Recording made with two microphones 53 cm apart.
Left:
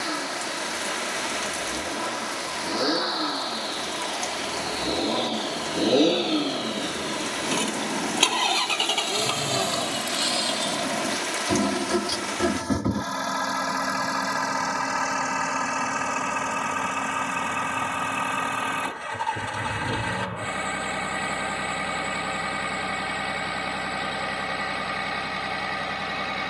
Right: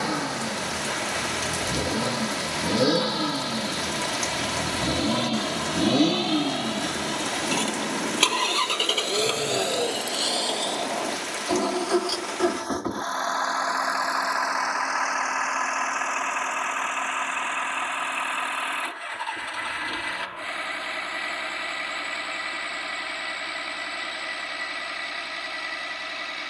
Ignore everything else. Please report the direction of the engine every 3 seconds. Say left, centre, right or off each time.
right, right, centre, left, left, left, left, left, left.